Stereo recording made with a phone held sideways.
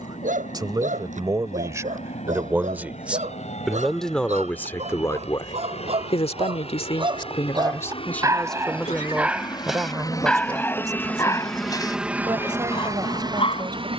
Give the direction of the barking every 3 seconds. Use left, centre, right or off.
right, right, right, centre, left.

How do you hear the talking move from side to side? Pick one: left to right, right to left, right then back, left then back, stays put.
left then back.